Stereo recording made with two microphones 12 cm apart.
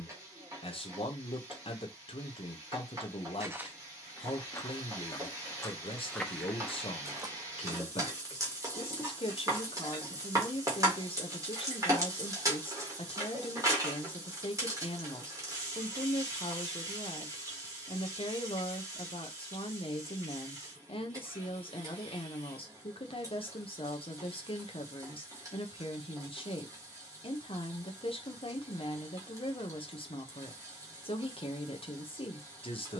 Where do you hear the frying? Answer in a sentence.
In this clip you hear the frying on the right.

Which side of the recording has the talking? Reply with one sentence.
In this clip you hear the talking on the left.